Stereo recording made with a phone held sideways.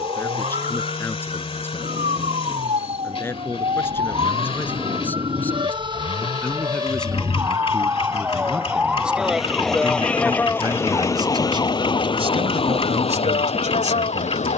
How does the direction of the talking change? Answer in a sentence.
In this clip you hear the talking move from left to right.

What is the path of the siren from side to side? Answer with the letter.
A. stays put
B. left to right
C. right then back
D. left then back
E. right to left
E.